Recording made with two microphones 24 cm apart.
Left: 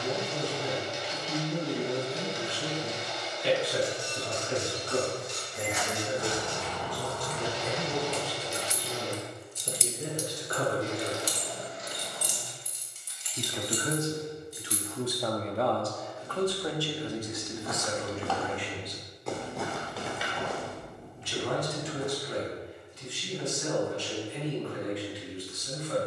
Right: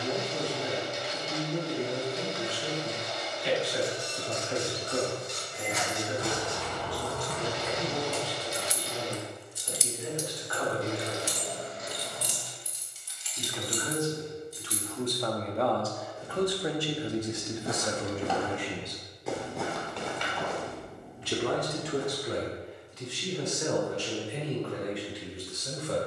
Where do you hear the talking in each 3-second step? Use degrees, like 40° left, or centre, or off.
60° left, 60° left, 60° left, 50° left, 20° left, 10° right, 40° right, 70° right, 80° right.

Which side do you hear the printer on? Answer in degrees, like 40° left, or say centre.
60° right.